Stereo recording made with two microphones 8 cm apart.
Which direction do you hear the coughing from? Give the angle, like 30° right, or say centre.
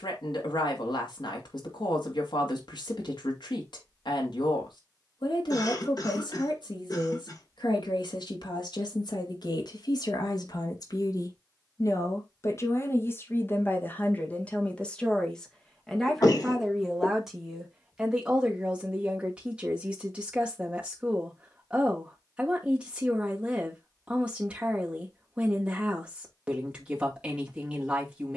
50° left.